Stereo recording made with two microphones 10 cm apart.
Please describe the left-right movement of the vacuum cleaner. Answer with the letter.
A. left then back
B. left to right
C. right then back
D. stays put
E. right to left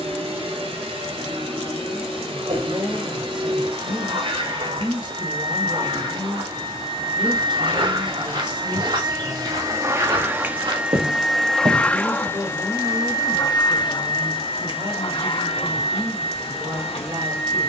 E.